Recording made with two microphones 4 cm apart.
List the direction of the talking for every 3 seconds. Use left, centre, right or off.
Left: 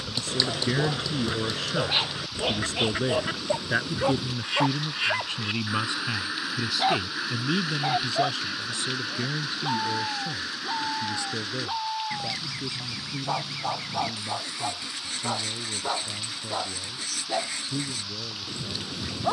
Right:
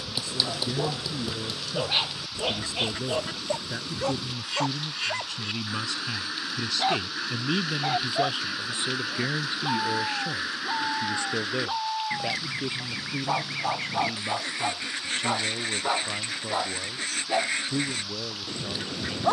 left, left, centre, right, right, right, right.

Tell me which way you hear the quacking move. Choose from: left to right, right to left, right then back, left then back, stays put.
left to right.